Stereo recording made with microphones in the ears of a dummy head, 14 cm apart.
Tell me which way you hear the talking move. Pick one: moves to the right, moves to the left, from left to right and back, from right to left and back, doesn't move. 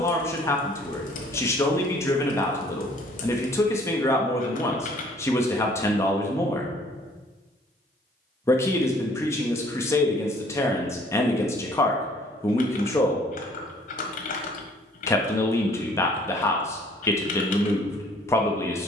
doesn't move.